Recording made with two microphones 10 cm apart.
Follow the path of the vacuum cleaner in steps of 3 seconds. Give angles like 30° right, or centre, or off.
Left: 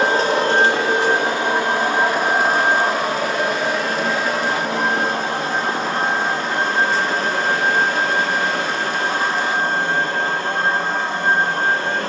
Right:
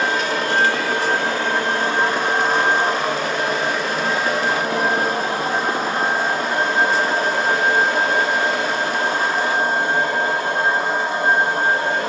20° left, centre, 10° right, 10° right.